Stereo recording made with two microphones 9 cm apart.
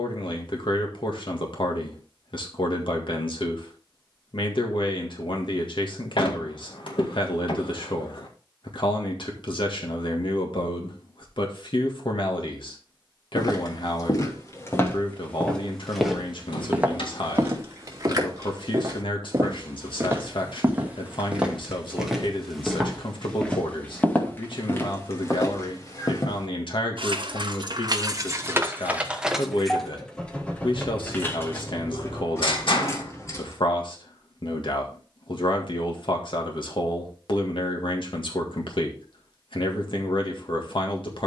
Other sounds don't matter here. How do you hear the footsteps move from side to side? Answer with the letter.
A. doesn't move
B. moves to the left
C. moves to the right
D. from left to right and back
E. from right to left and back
D.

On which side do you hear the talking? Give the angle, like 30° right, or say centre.
70° left.